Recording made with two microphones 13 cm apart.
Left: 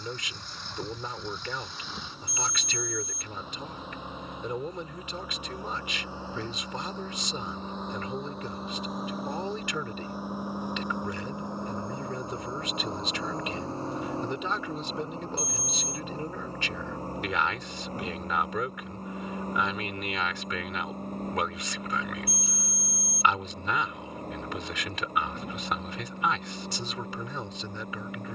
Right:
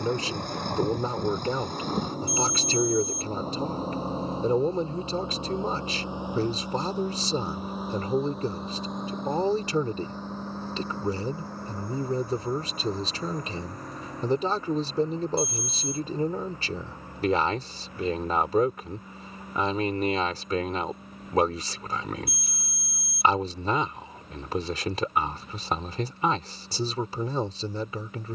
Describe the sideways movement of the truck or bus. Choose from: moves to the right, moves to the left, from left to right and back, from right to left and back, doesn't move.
moves to the left.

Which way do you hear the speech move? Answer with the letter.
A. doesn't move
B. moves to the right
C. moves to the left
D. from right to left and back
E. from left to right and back
A.